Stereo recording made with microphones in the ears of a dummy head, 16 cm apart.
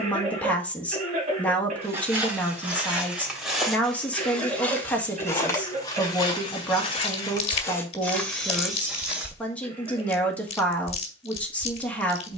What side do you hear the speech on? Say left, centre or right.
centre.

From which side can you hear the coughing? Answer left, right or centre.
right.